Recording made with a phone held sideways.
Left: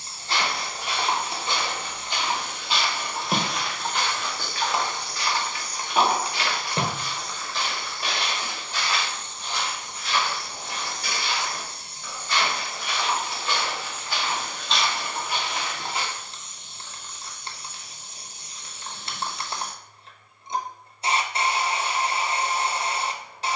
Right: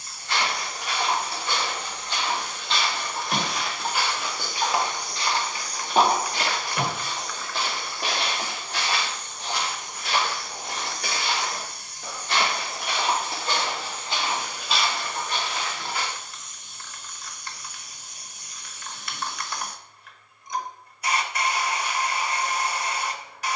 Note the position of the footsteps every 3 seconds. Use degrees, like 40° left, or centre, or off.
20° left, 10° right, 50° right, 70° right, 40° right, 20° left, off, off.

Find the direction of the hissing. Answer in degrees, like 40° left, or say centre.
30° left.